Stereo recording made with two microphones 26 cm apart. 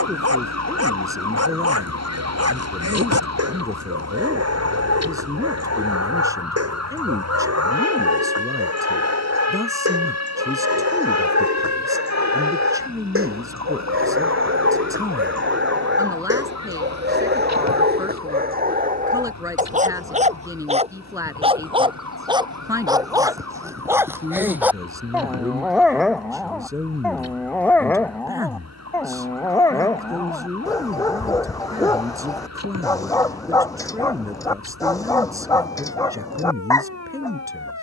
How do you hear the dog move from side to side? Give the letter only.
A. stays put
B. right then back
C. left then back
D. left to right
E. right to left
E.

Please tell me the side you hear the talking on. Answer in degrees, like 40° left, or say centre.
10° right.